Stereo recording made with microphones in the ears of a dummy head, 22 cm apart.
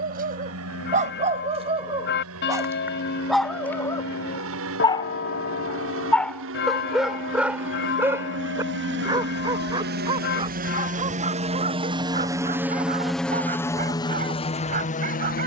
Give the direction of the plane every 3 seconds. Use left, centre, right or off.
right, right, right, right, centre.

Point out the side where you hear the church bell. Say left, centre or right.
left.